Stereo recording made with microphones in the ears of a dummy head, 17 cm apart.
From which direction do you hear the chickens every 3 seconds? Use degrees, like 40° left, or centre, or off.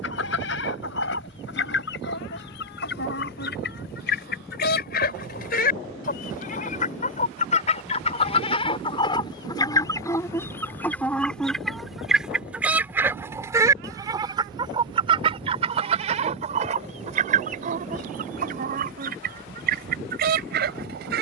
60° left, 50° left, 40° left, 10° left, 10° right, 40° right, 50° right.